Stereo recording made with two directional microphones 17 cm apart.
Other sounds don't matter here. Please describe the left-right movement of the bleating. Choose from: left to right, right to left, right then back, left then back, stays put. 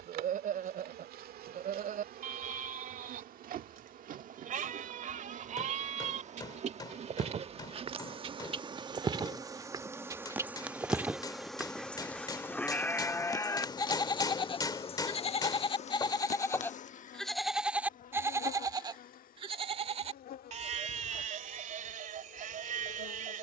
left then back.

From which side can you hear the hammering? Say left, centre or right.
left.